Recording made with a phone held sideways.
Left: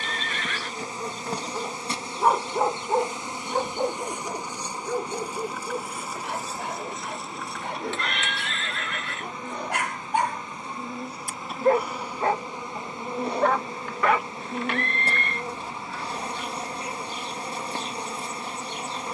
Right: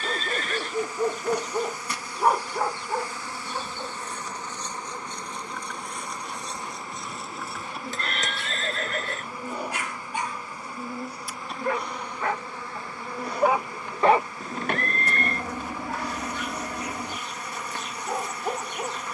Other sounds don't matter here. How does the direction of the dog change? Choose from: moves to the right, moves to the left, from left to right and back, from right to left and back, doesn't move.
from right to left and back.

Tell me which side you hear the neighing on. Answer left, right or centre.
right.